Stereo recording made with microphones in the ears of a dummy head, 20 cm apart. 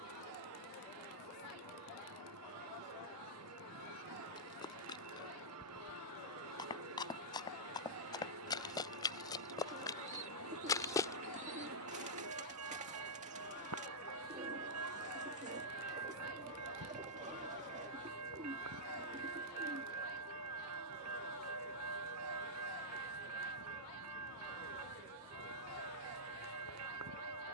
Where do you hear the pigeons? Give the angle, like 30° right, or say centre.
30° right.